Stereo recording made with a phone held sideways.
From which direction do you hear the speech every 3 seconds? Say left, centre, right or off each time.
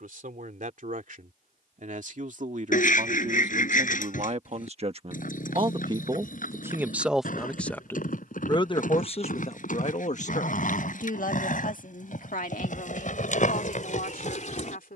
right, right, centre, left, left.